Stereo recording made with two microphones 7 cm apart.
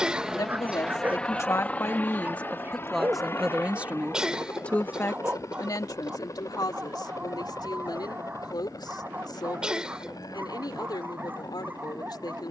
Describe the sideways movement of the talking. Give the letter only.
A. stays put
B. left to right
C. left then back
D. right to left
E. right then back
E.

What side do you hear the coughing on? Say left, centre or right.
centre.